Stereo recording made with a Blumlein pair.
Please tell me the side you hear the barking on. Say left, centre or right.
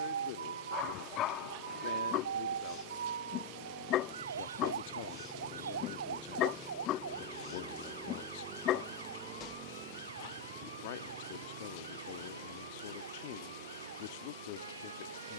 left.